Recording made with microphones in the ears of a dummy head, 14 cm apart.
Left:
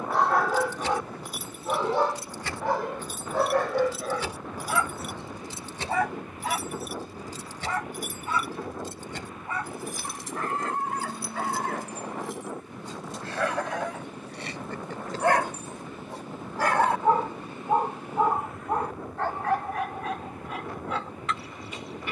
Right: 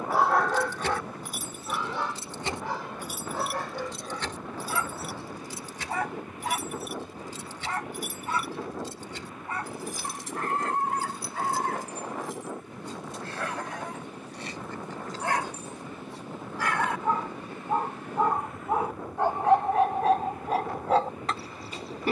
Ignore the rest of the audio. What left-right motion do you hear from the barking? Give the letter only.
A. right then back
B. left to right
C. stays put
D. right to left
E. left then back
E.